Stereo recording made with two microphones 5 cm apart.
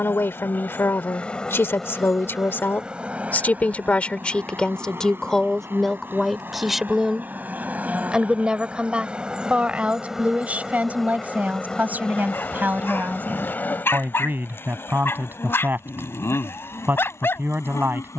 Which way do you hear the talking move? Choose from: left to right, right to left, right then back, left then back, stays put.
left to right.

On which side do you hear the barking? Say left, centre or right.
left.